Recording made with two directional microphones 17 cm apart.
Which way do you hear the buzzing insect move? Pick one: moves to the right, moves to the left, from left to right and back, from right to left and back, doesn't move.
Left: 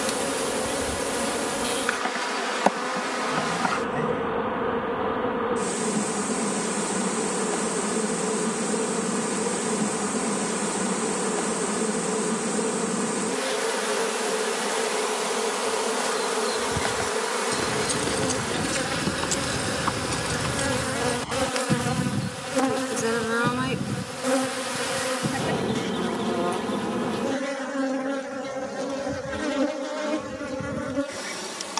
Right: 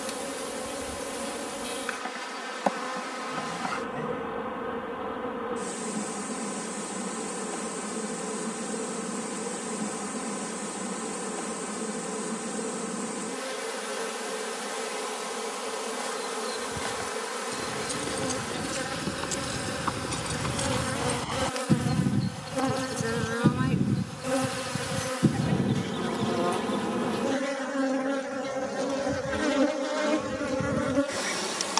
moves to the right.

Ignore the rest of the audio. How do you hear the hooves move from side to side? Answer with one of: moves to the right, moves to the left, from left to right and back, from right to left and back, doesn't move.
moves to the right.